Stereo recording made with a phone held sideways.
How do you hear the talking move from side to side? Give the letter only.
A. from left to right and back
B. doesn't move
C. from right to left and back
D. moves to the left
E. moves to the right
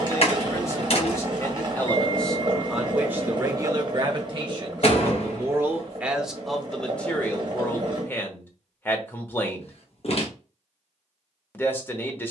A.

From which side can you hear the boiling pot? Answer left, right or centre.
right.